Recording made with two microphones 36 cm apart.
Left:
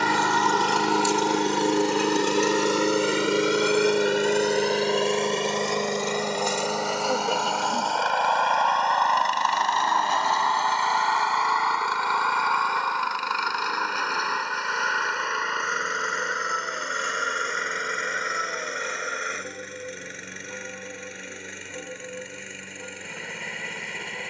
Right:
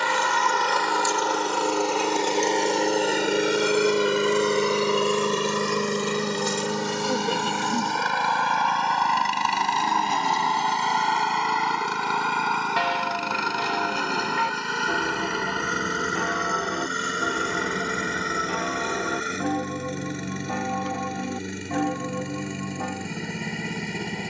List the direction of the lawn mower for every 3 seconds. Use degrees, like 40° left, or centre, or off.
30° left, 10° right, 30° right, 40° right, 50° right, 50° right, 50° right, 50° right.